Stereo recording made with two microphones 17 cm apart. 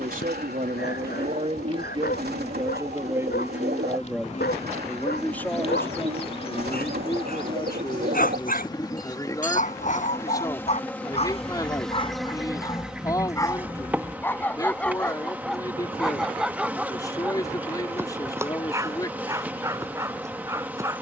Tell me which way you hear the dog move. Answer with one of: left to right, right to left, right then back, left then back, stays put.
left to right.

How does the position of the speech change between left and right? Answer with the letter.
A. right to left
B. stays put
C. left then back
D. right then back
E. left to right
A.